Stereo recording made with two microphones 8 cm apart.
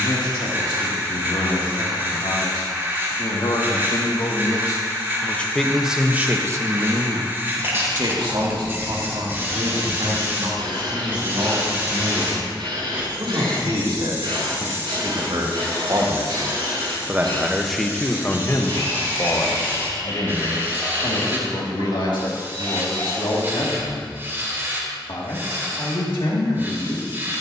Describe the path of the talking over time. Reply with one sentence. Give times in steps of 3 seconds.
In this clip you hear the talking on the left from 0 s, on the right from 6 s and on the left from 18 s.